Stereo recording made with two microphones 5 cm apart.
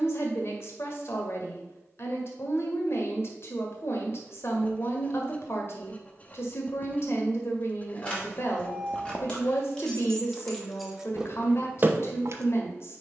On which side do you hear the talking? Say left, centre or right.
left.